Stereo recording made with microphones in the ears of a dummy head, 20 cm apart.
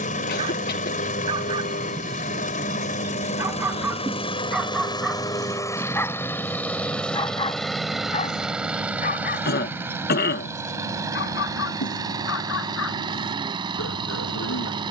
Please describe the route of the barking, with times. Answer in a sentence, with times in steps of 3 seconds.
You can hear the barking on the right from 0 s, in the centre from 3 s and on the left from 6 s.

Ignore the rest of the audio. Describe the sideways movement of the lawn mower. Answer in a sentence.
In this clip you hear the lawn mower travel towards the right.